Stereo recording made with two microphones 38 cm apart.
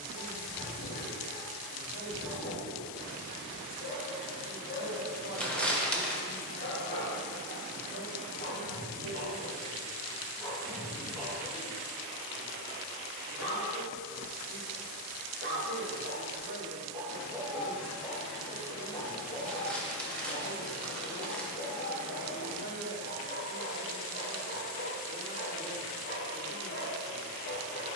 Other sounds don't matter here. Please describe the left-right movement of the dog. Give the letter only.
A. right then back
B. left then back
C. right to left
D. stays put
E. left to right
A.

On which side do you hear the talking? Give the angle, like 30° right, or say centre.
70° left.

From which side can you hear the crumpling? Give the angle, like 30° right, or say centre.
centre.